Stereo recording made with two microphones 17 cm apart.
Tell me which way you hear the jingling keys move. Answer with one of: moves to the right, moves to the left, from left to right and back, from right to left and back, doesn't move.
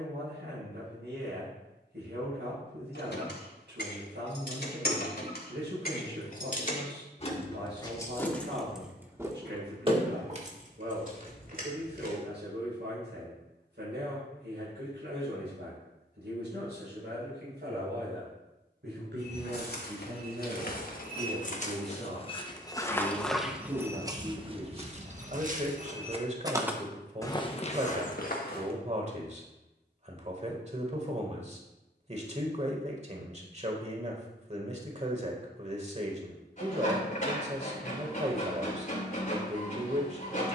moves to the right.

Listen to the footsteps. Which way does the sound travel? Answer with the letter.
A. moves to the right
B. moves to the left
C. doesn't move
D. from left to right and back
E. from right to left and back
D.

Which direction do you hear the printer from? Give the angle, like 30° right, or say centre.
50° left.